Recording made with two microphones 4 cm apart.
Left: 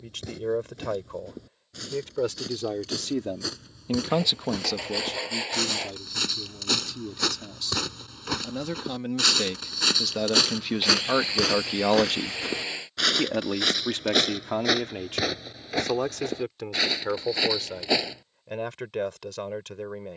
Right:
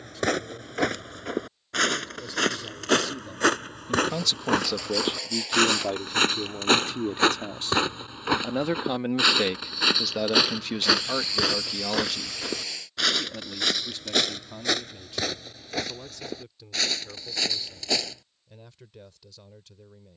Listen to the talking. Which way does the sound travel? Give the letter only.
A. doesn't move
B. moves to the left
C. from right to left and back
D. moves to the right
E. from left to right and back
E.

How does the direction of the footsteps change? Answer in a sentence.
In this clip you hear the footsteps go from the right side to the left.